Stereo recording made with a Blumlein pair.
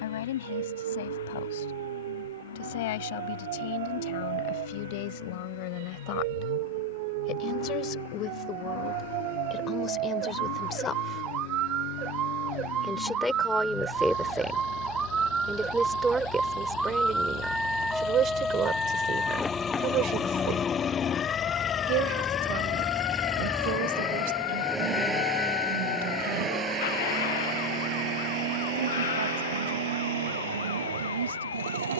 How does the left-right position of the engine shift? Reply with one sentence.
In this clip you hear the engine move from left to right.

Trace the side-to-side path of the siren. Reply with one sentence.
In this clip you hear the siren go from the right side to the left.